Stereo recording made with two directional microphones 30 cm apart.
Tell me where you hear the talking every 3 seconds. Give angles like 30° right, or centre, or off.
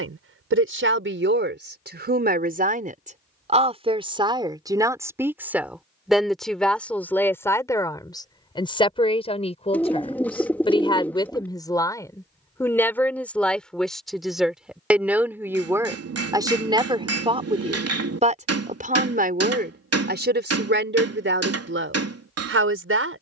40° right, 10° right, 10° left, 20° left, centre, 10° right, 30° right, 40° right.